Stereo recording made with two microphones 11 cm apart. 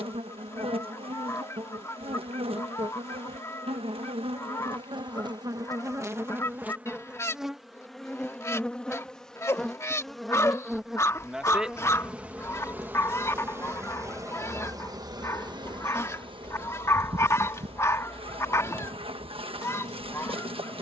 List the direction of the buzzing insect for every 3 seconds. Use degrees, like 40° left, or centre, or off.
60° right, 50° right, 10° right, centre, 20° right, 50° right, 60° right.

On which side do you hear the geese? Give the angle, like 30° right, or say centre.
30° left.